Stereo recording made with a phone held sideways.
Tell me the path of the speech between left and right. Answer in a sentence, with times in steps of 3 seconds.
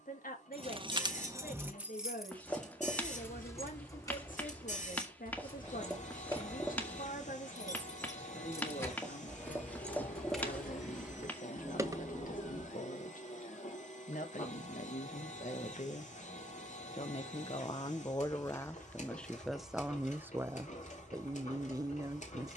In this clip you hear the speech on the left from 0 s, in the centre from 18 s and on the right from 21 s.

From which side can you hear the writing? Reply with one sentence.
In this clip you hear the writing in the centre.